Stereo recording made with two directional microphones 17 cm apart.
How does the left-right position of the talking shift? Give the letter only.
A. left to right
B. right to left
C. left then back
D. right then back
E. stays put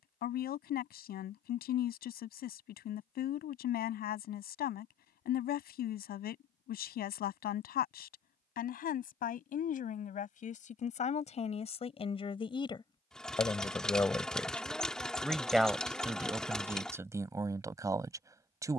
A.